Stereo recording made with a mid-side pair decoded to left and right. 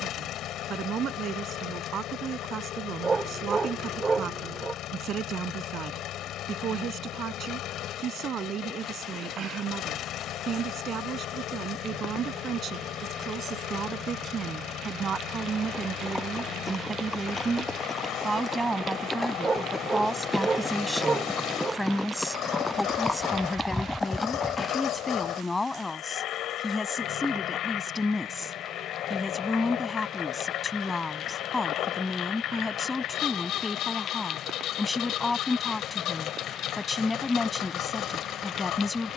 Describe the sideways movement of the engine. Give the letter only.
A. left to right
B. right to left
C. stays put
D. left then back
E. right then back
C.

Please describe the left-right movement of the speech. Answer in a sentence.
In this clip you hear the speech go from the right side to the left.